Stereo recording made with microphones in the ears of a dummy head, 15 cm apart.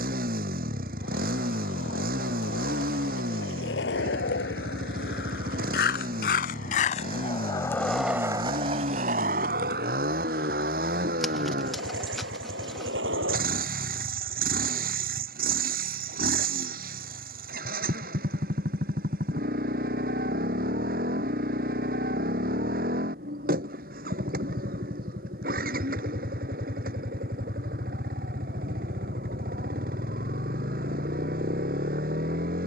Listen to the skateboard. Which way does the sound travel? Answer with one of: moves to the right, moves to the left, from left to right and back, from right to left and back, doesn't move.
moves to the right.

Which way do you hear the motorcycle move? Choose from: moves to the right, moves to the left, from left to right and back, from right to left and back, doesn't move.
doesn't move.